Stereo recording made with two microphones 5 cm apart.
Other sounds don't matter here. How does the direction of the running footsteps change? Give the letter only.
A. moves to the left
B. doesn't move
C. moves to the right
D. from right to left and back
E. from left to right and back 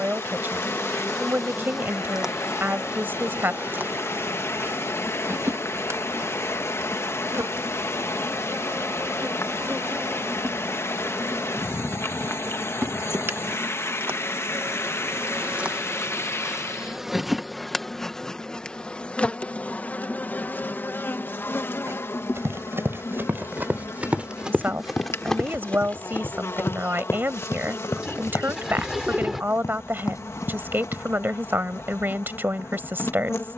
A.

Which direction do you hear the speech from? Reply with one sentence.
In this clip you hear the speech on the right.